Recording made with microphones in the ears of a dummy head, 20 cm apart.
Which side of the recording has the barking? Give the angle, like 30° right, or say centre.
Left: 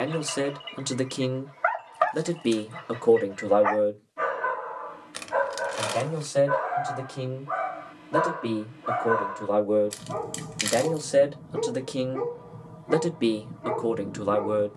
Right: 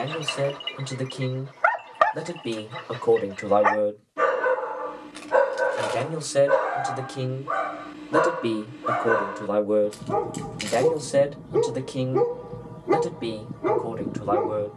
50° right.